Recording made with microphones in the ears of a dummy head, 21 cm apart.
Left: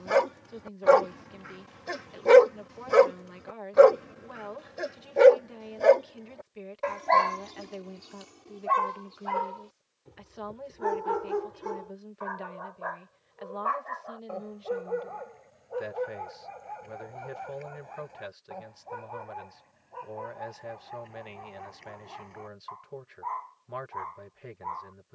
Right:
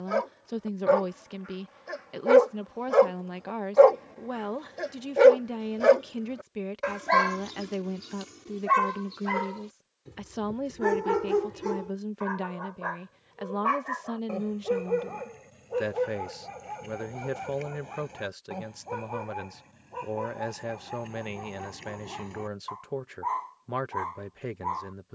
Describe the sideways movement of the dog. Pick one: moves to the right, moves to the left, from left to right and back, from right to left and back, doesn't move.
moves to the right.